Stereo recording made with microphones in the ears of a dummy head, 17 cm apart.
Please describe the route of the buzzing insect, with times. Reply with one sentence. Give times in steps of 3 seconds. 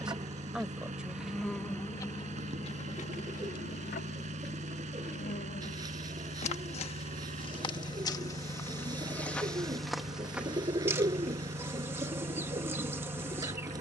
You can hear the buzzing insect in the centre from 0 s, on the left from 3 s and in the centre from 9 s.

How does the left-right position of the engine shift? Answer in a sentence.
In this clip you hear the engine stay in one place.